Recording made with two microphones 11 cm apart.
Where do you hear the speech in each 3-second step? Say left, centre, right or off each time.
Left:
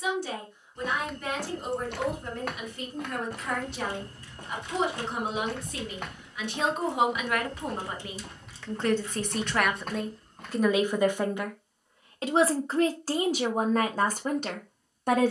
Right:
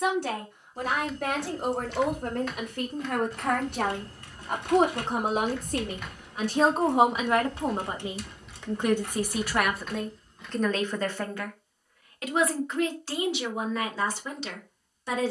right, right, right, centre, left.